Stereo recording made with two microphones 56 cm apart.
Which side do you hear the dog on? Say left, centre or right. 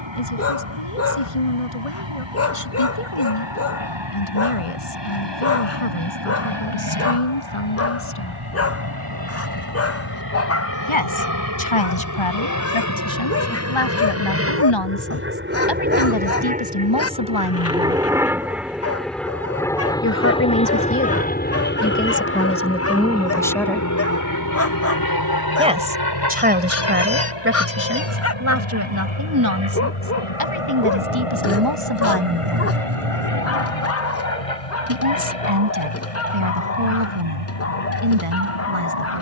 left.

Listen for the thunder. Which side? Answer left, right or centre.
right.